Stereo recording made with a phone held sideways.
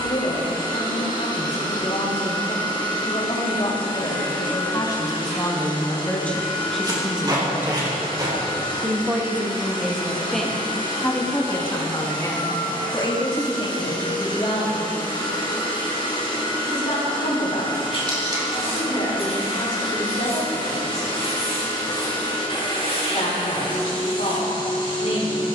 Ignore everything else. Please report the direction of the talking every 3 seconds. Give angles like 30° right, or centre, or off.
50° left, 30° left, centre, centre, 40° left, 50° left, 50° left, 50° left, 50° left.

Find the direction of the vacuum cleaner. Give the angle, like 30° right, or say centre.
30° left.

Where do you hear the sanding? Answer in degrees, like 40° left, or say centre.
40° left.